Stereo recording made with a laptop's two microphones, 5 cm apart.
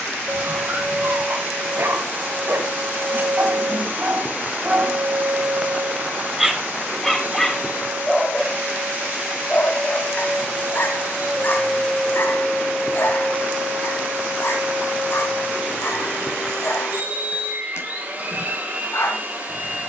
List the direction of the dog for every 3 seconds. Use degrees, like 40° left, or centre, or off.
50° right, 30° right, 10° left, 40° left, 60° left, 60° left, 60° left.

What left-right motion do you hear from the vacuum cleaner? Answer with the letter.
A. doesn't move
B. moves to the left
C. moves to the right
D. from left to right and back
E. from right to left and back
A.